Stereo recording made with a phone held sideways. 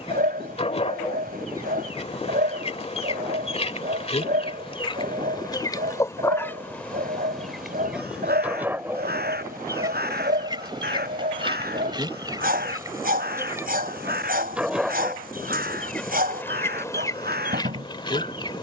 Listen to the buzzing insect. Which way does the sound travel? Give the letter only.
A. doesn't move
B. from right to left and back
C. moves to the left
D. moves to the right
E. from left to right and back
E.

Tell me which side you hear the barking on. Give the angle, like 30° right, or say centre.
60° right.